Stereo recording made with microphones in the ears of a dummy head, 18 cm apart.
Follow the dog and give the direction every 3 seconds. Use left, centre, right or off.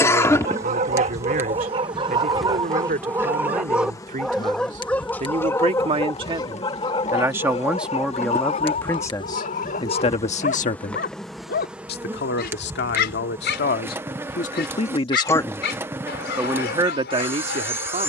right, centre, left, left, left, left.